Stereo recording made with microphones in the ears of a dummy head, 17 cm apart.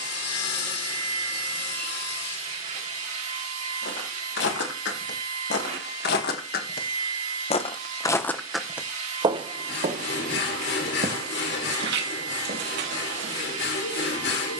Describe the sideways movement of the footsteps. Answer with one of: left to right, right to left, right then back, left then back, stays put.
left to right.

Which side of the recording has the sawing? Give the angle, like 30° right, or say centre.
60° left.